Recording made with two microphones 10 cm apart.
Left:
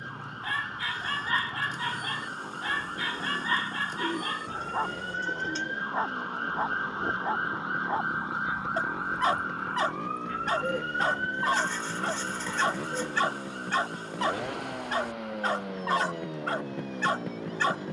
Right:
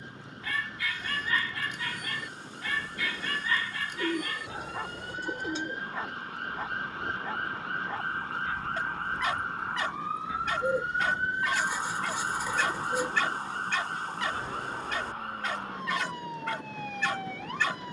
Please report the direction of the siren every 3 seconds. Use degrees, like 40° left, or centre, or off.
50° left, 40° left, 20° left, 10° right, 40° right, 60° right.